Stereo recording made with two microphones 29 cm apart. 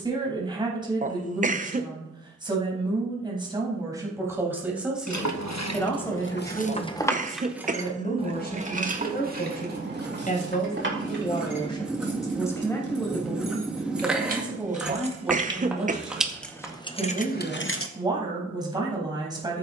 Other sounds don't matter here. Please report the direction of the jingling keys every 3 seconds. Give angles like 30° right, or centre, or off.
off, 70° left, centre, 40° right, 30° right, 10° left, off.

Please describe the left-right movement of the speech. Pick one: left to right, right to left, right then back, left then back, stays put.
left then back.